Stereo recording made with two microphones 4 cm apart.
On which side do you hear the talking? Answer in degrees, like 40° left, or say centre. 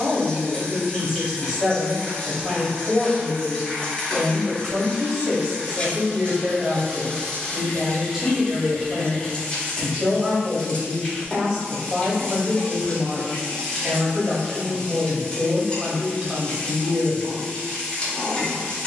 20° right.